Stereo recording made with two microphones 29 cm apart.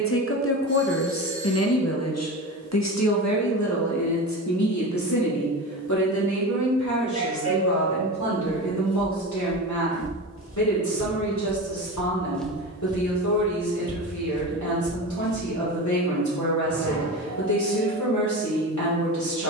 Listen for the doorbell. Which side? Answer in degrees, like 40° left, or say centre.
60° left.